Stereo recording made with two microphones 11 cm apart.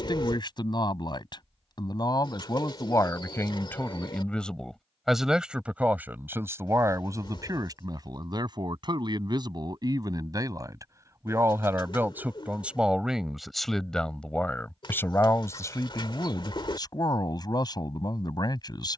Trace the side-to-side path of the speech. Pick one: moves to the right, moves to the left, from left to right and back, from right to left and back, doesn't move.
from left to right and back.